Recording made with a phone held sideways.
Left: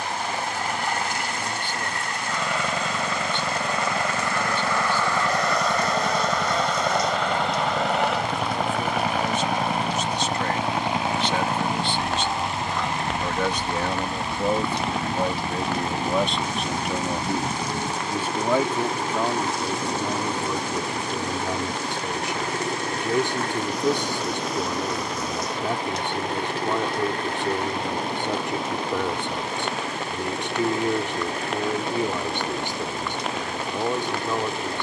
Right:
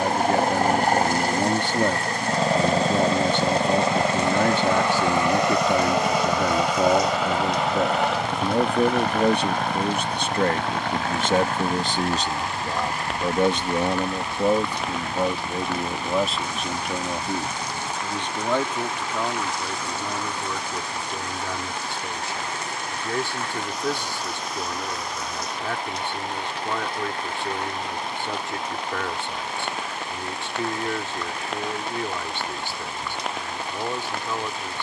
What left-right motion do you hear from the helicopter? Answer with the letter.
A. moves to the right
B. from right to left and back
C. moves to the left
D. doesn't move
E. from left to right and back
C.